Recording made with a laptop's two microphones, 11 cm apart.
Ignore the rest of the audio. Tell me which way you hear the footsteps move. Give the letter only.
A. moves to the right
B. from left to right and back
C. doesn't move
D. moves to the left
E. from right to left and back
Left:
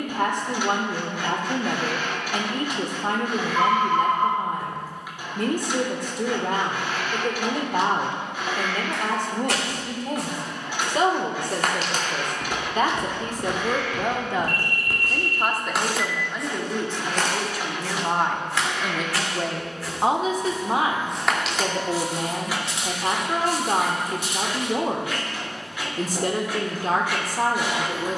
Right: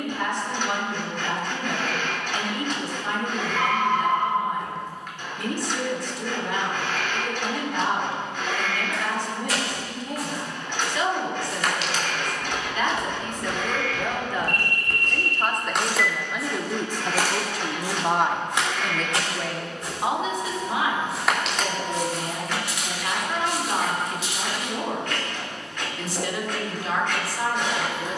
B.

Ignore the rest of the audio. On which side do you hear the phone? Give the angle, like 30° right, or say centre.
30° left.